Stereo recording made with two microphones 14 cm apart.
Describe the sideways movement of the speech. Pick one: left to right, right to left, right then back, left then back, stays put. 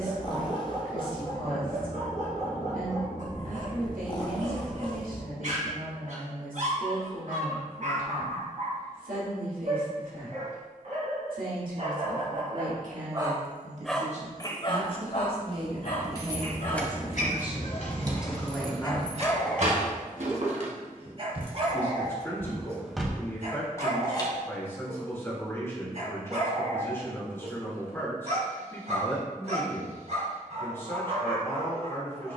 right to left.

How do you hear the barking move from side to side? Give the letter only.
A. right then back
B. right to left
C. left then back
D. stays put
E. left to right
C.